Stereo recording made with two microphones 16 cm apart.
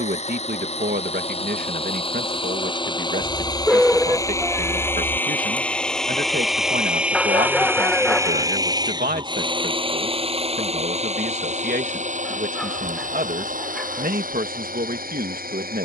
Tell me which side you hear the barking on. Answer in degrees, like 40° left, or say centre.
centre.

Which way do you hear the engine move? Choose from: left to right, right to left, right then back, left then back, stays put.
left to right.